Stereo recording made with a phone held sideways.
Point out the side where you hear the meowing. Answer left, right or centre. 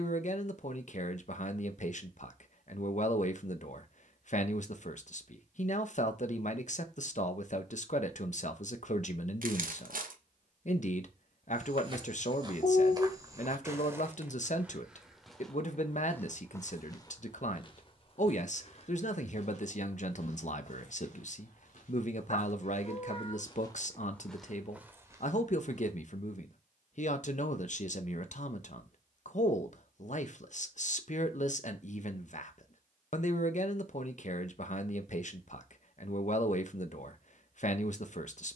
left.